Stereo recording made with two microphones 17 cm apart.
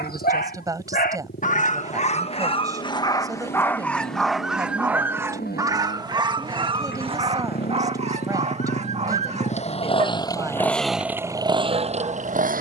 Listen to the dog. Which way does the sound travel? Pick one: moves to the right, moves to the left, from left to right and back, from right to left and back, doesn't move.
moves to the right.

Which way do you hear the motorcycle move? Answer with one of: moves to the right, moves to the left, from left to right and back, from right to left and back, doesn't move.
moves to the right.